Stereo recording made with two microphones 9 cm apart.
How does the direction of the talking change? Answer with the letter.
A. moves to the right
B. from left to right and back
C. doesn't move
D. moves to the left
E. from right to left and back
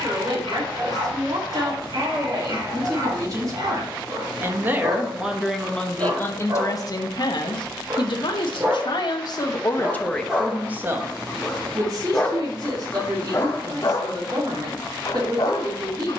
E.